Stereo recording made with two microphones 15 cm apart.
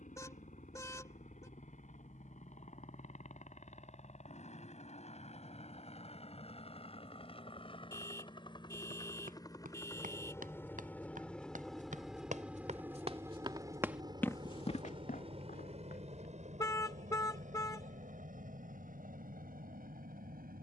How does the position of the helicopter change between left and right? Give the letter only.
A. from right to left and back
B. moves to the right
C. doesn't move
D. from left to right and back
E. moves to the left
B.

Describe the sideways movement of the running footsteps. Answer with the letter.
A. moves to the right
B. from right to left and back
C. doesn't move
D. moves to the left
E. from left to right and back
D.